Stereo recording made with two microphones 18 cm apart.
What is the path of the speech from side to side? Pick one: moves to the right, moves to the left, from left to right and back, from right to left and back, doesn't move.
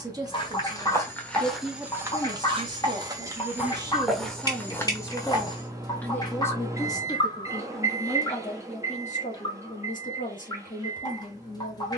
moves to the left.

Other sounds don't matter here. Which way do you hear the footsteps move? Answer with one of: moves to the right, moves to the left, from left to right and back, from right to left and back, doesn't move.
from left to right and back.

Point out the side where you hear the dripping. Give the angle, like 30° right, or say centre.
20° left.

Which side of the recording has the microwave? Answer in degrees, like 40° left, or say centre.
20° right.